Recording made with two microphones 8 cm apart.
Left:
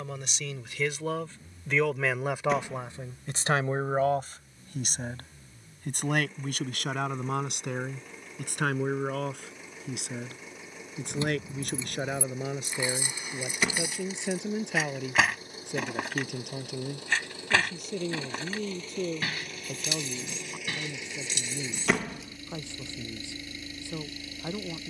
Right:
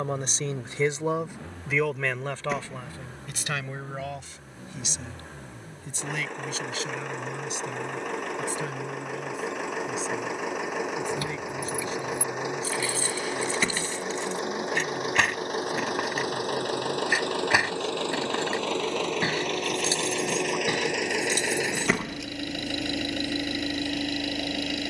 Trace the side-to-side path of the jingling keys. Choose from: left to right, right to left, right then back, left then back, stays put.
left to right.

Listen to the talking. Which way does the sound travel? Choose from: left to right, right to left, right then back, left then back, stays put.
right to left.